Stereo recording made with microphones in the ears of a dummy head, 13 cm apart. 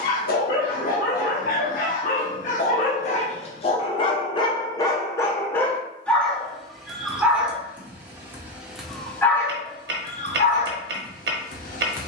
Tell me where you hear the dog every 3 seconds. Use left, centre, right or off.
left, left, centre, left.